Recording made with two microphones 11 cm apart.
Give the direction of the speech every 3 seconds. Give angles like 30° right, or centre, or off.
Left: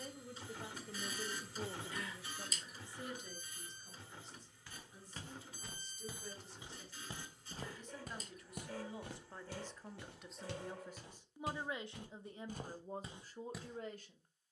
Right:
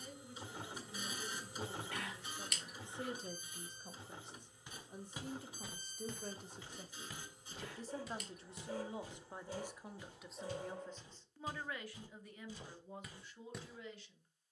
30° left, 50° right, 40° right, centre, 40° left.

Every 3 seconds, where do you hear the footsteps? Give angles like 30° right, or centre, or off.
off, 10° right, 30° left, 70° left, 30° left.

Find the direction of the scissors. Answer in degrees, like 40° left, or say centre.
70° right.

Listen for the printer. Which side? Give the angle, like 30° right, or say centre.
20° right.